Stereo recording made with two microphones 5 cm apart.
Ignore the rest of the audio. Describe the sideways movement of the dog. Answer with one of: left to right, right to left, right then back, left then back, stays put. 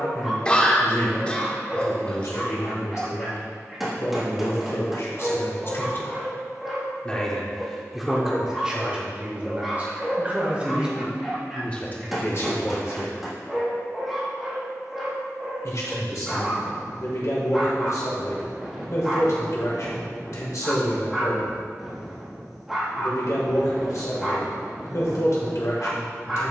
stays put.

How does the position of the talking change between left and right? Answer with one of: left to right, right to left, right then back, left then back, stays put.
right then back.